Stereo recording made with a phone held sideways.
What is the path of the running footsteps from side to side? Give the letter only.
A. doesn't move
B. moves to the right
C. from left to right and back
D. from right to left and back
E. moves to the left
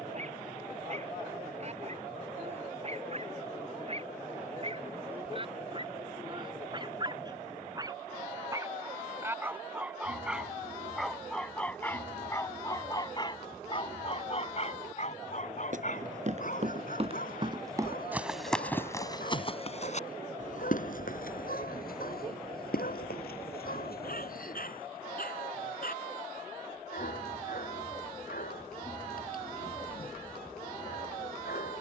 E.